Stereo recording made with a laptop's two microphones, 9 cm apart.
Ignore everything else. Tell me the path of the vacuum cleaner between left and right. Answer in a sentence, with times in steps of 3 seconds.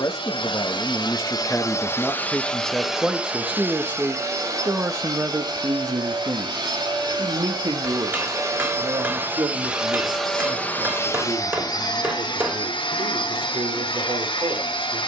You can hear the vacuum cleaner on the left from 0 s, on the right from 3 s, in the centre from 9 s and on the left from 12 s.